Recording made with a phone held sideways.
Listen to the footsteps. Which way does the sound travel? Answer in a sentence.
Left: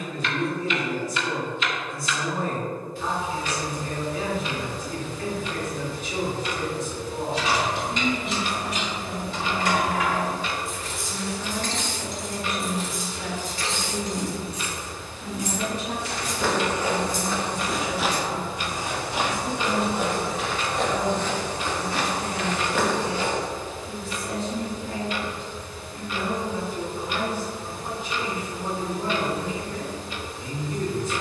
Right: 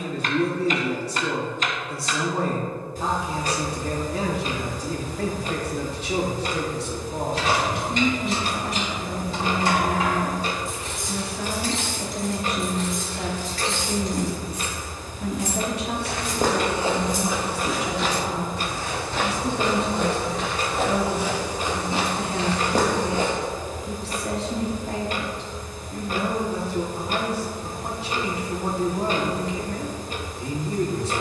You can hear the footsteps move from right to left and back again.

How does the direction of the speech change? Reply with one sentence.
In this clip you hear the speech stay put.